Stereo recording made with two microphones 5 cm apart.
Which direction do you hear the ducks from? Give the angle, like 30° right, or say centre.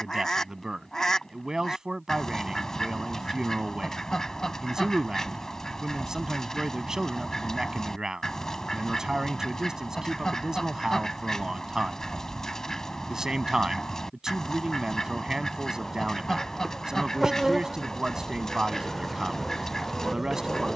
10° left.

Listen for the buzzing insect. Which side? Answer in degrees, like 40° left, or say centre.
centre.